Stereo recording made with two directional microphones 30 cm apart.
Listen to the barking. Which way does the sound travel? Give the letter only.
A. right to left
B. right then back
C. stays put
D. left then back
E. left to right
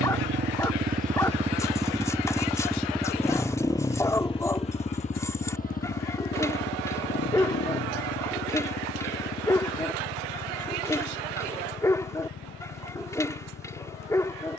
C.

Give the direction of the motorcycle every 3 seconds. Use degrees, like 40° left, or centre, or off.
20° right, 20° left, 40° left, 40° left, 50° left.